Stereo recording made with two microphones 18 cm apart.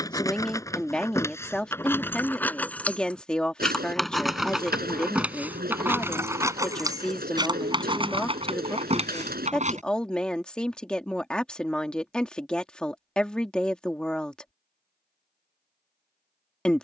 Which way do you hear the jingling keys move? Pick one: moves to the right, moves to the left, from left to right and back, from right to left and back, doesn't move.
moves to the right.